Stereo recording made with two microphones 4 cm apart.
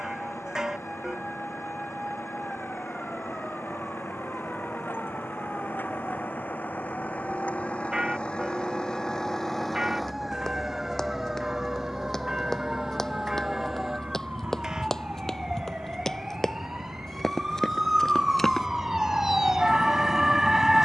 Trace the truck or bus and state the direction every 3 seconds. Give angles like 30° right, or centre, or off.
60° left, 50° left, 30° left, 10° right, 40° right, 60° right, 70° right.